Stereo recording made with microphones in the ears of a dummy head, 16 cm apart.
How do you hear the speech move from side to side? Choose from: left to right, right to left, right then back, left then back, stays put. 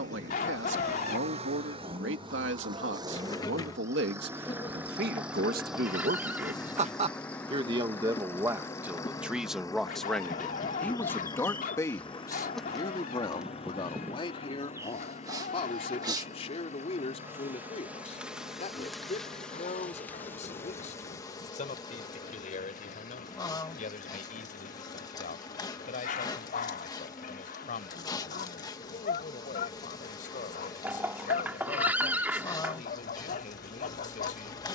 right to left.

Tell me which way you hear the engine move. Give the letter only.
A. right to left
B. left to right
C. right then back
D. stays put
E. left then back
A.